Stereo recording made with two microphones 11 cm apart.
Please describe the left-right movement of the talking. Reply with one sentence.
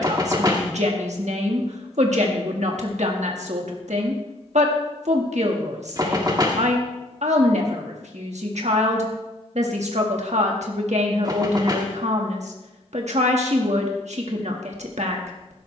In this clip you hear the talking stay put.